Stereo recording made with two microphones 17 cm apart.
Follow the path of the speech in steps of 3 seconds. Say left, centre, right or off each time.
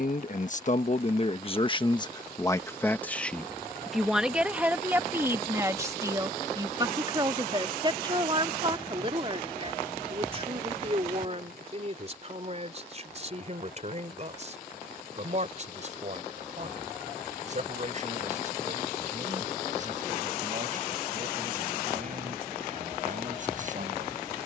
left, centre, right, right, right, right, right, right.